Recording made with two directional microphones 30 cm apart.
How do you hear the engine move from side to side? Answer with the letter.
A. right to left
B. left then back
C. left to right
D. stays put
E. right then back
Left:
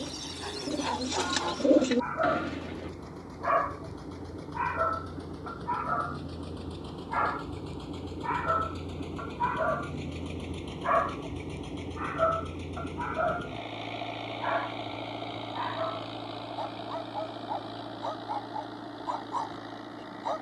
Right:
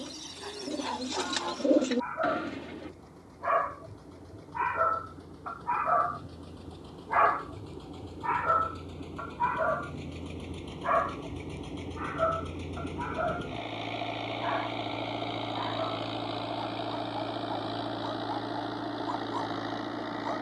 C.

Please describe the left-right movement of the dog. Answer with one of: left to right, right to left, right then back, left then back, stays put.
right then back.